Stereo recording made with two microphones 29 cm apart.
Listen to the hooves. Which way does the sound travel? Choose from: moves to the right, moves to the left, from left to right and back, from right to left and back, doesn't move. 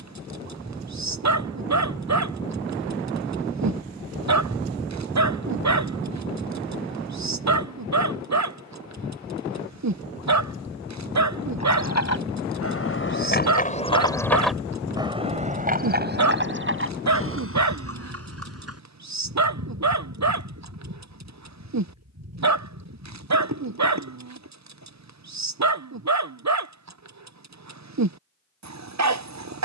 moves to the right.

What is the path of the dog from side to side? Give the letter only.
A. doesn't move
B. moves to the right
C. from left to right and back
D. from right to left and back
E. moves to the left
A.